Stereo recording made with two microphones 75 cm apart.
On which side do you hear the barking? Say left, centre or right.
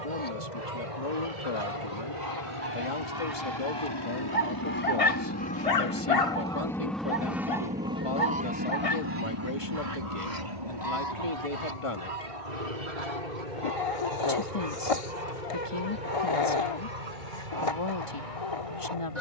left.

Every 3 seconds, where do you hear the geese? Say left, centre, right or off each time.
right, centre, centre, right, right, right, right.